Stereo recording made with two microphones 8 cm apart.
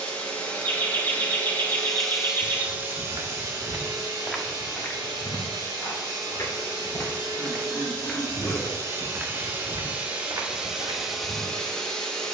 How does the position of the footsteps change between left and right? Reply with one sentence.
You can hear the footsteps go left and come back.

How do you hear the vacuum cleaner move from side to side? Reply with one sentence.
You can hear the vacuum cleaner go right and come back.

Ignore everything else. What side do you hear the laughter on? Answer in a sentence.
In this clip you hear the laughter on the left.